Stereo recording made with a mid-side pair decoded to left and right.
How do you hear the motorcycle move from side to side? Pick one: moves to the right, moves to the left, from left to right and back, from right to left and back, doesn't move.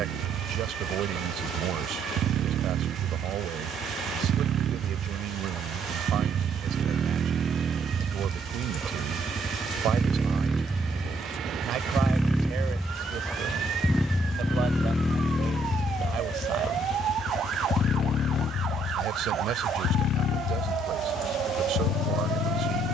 moves to the left.